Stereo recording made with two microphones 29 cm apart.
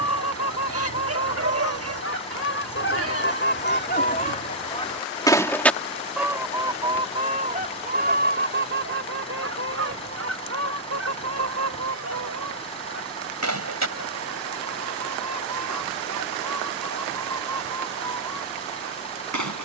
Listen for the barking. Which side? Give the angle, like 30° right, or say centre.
50° right.